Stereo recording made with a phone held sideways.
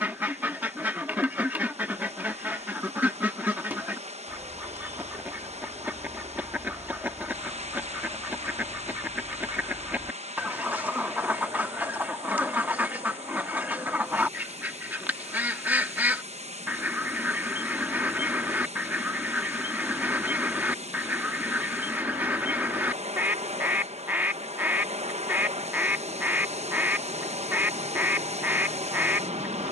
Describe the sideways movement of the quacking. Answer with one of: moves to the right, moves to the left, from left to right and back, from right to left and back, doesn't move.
doesn't move.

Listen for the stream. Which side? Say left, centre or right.
right.